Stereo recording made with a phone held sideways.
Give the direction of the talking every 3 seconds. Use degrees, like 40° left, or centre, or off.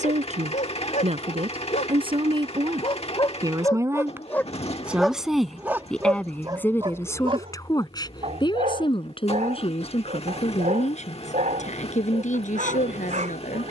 40° right, 10° right, 20° left, 40° left, 50° left.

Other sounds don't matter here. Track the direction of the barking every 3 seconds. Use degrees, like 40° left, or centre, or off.
50° left, 10° left, 30° right, 50° right, 50° right.